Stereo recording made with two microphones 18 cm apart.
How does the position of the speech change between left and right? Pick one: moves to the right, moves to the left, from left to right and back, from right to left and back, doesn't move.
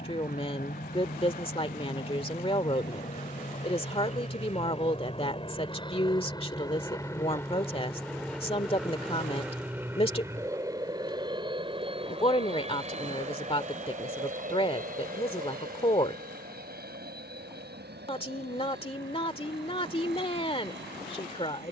doesn't move.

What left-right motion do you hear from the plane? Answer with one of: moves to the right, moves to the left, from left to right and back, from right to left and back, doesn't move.
moves to the right.